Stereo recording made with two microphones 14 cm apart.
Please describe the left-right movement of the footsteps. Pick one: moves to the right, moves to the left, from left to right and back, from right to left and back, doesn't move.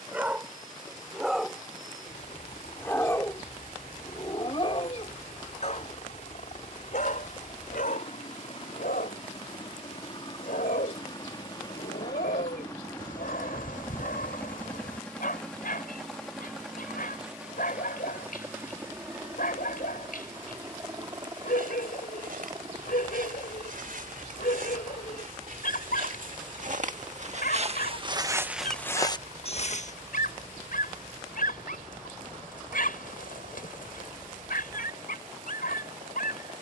moves to the left.